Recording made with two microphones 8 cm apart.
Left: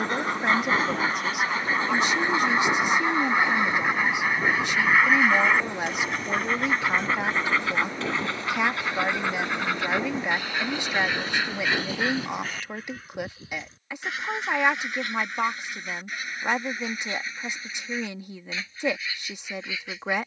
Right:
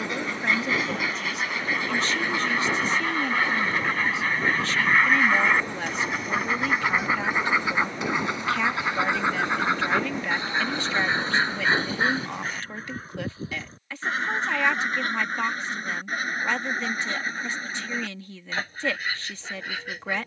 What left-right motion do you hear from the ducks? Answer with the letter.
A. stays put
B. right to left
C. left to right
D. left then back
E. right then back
C.